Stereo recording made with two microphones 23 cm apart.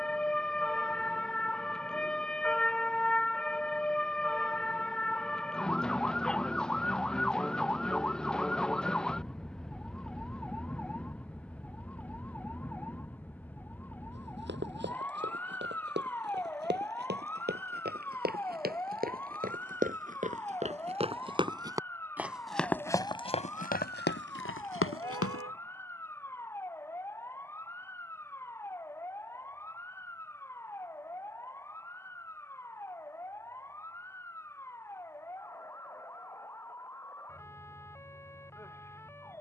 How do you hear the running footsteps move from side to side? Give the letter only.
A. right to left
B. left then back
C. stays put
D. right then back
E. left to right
A.